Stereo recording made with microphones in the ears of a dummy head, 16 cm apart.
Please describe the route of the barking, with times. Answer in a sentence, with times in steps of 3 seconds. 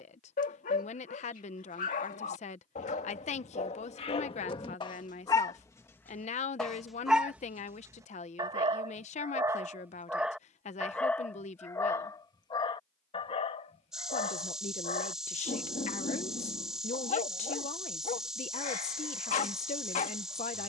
You can hear the barking on the left from 0 s, in the centre from 6 s and on the left from 12 s.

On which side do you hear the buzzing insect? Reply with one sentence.
In this clip you hear the buzzing insect in the centre.